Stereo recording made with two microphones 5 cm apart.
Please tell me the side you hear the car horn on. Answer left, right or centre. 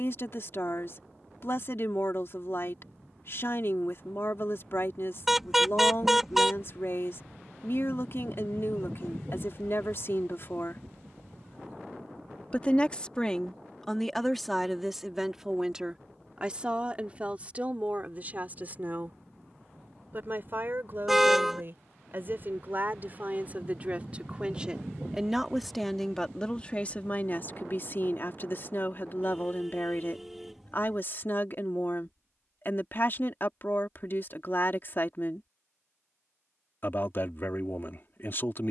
centre.